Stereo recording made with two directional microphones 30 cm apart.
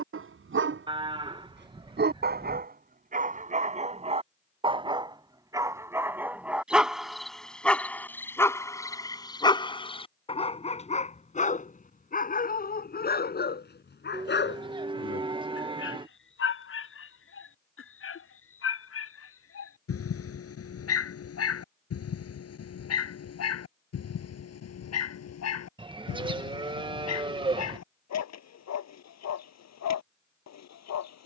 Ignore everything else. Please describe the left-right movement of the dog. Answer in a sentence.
You can hear the dog move to the left.